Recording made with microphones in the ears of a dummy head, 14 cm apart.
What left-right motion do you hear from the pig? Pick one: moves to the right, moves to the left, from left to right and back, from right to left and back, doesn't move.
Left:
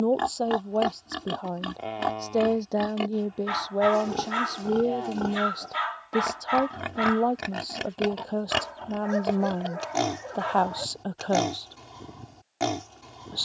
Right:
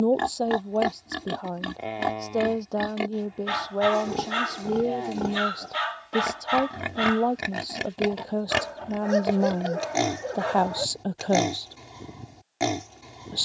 doesn't move.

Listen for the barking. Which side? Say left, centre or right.
right.